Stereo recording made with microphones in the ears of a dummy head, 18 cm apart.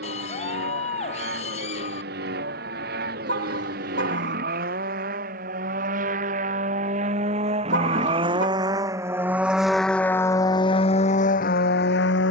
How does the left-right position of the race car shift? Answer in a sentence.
In this clip you hear the race car move from right to left.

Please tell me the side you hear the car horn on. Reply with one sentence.
In this clip you hear the car horn on the right.